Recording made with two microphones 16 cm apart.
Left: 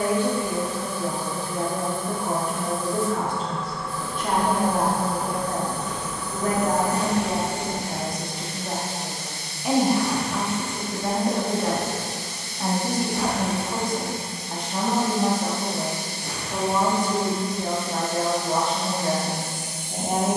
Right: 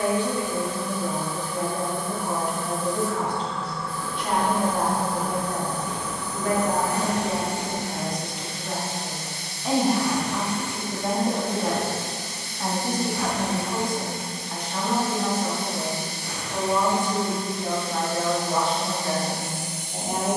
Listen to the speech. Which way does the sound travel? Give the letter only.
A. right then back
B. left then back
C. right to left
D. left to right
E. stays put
A.